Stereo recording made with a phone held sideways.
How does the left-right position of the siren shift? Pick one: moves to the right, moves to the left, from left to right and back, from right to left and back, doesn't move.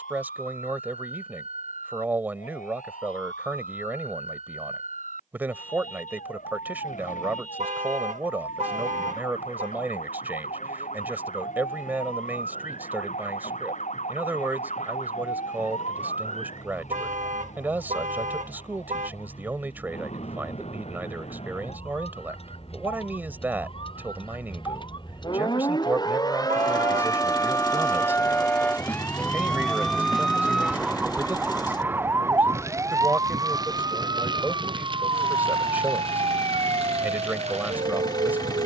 moves to the right.